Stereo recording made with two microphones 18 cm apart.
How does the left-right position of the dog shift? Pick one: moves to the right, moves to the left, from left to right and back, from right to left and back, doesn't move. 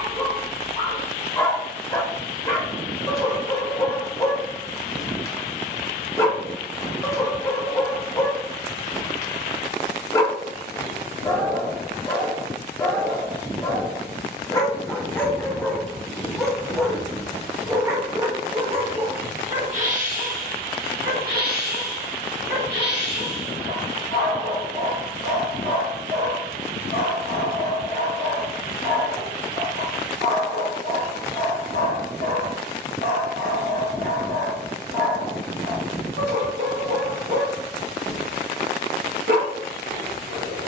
moves to the right.